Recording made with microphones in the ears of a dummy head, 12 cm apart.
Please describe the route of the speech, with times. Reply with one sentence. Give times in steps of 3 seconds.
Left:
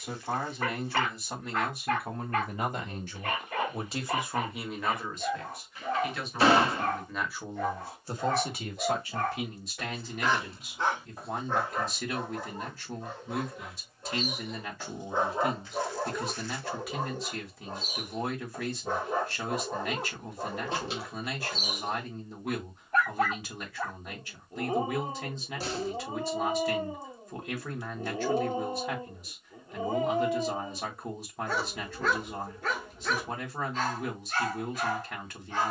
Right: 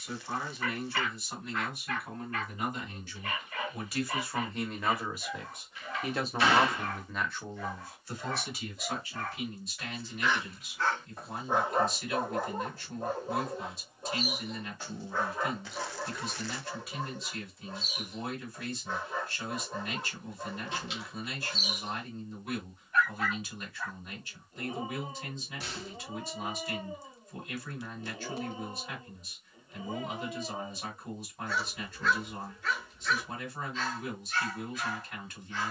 In this clip you hear the speech on the left from 0 s, in the centre from 3 s and on the left from 9 s.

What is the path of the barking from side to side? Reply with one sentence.
You can hear the barking go right and come back.